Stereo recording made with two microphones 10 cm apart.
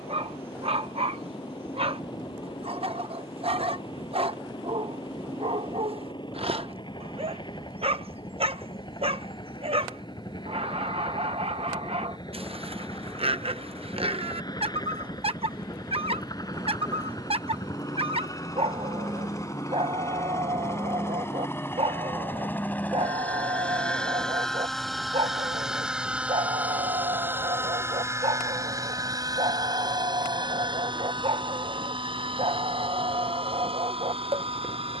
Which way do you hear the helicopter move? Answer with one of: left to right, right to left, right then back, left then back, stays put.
left to right.